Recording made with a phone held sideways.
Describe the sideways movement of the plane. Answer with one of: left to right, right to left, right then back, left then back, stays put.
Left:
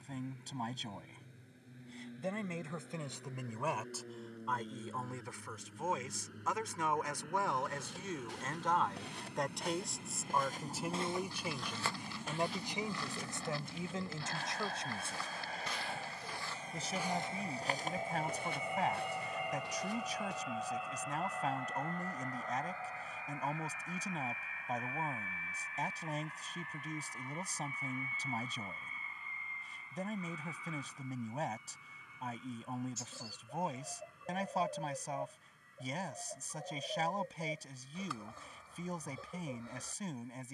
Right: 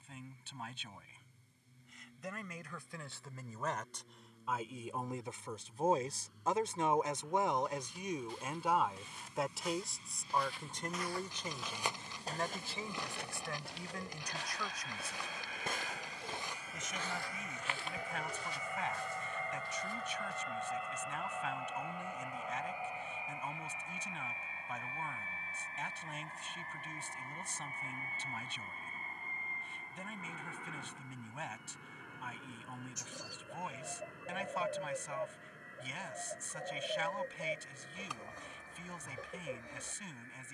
left to right.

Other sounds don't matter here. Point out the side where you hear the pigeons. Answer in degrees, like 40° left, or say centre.
20° right.